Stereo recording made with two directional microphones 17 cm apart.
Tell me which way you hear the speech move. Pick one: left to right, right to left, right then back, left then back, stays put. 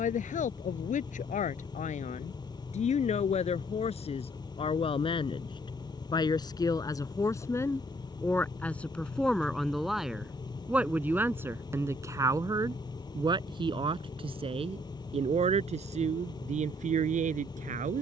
left to right.